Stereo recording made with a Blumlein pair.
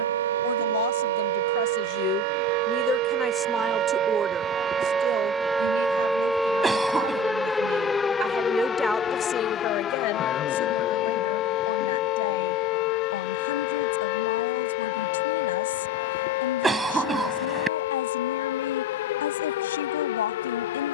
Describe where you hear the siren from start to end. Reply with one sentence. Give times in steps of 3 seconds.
You can hear the siren on the right from 0 s, in the centre from 6 s and on the left from 9 s.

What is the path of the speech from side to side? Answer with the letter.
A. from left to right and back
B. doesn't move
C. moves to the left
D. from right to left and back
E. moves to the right
A.